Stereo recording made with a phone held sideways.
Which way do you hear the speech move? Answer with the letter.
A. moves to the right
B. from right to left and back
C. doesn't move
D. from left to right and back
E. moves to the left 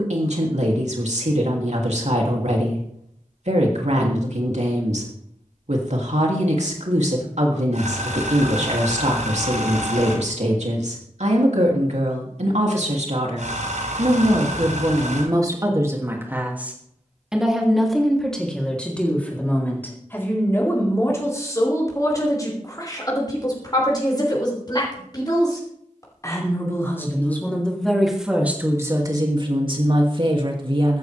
B.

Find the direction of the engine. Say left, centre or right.
right.